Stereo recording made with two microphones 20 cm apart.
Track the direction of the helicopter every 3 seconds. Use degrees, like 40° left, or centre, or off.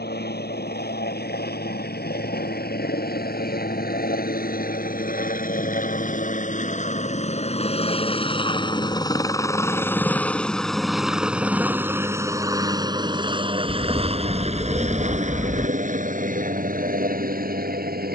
70° left, 60° left, 40° left, centre, 30° right, 40° right.